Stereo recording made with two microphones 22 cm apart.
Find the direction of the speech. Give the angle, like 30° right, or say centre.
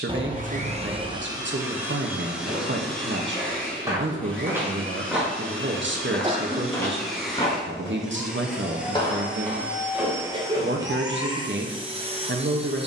60° right.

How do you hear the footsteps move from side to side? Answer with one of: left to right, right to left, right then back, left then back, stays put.
left then back.